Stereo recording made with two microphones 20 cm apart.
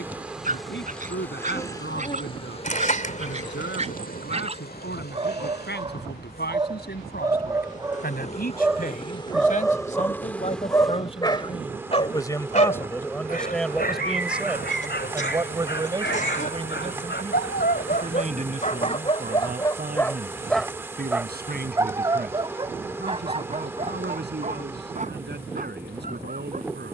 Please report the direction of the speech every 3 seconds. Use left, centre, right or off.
left, left, left, left, centre, right, right, right, right.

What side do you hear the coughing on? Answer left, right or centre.
left.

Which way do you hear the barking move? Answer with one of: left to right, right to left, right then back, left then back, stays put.
left then back.